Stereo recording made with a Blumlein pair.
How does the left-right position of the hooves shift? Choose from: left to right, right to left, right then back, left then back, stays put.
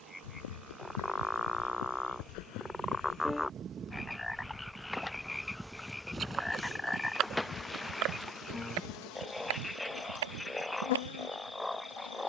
left to right.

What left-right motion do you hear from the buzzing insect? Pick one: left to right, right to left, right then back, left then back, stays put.
right to left.